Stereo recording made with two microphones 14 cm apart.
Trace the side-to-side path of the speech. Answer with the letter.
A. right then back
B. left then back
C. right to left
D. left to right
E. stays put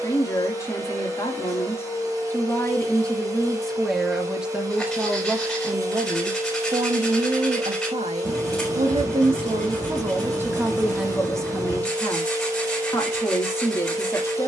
A.